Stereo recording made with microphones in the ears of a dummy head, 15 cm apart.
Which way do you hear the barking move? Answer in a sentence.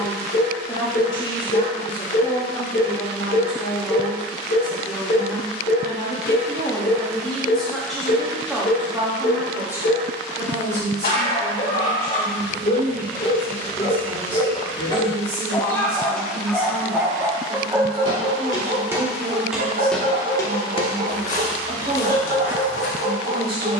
You can hear the barking move to the right.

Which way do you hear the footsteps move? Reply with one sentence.
You can hear the footsteps travel towards the left.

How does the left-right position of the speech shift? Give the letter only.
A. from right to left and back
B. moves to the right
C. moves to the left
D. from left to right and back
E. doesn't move
B.